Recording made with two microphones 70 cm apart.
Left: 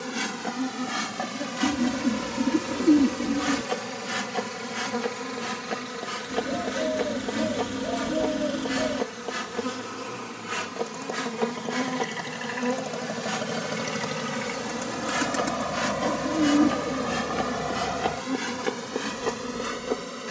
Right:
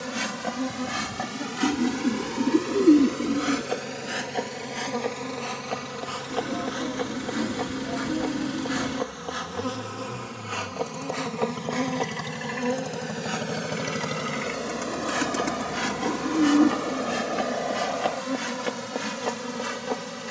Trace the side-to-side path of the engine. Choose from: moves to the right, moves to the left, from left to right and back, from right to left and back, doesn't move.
moves to the left.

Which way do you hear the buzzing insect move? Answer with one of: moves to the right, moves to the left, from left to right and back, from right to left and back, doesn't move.
from right to left and back.